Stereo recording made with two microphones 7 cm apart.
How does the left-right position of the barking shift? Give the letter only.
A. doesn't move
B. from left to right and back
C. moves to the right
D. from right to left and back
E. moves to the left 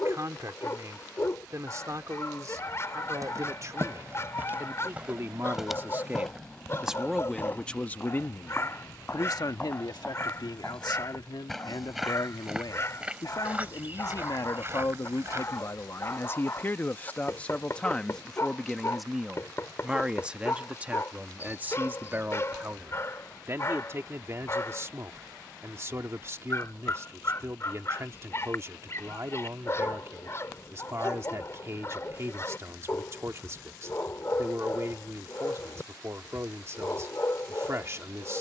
A.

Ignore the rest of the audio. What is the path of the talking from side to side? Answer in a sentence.
In this clip you hear the talking move from right to left and back again.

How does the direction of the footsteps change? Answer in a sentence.
In this clip you hear the footsteps move from right to left and back again.